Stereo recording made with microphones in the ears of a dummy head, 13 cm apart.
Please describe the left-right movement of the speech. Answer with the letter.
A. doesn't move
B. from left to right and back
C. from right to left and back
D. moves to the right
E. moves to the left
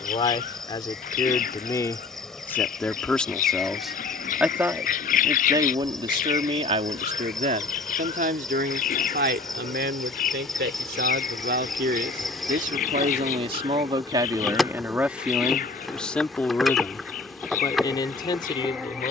B.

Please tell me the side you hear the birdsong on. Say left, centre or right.
left.